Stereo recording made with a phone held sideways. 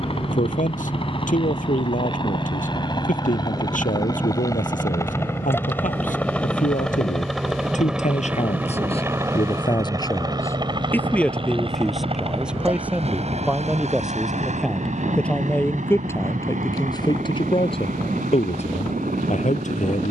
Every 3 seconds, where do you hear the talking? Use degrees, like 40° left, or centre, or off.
80° left, 80° left, 70° left, 20° left, 10° right, 30° left, 60° left.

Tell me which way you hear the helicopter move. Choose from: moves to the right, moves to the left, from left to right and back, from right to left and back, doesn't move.
moves to the right.